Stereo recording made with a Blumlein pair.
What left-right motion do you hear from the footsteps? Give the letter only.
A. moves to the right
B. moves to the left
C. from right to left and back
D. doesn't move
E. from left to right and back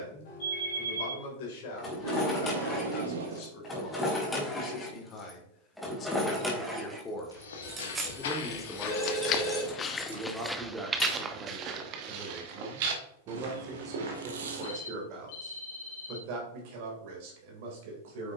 A.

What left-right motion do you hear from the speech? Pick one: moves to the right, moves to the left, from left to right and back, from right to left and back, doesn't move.
moves to the right.